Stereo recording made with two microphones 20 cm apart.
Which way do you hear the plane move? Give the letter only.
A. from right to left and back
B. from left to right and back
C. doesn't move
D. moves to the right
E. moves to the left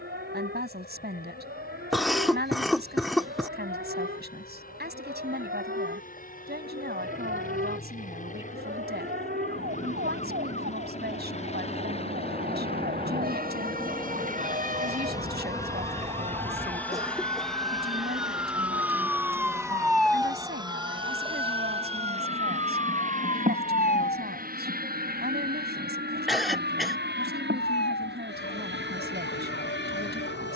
D.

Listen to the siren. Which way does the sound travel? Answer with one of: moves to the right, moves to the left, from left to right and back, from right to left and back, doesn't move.
moves to the left.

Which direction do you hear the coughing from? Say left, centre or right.
centre.